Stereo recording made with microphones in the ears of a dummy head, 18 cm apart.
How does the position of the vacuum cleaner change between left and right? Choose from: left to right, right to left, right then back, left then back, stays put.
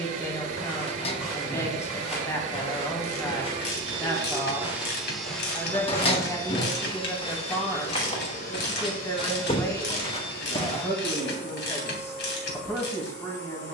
right to left.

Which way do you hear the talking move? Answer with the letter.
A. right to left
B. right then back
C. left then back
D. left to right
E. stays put
E.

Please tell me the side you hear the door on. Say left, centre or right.
left.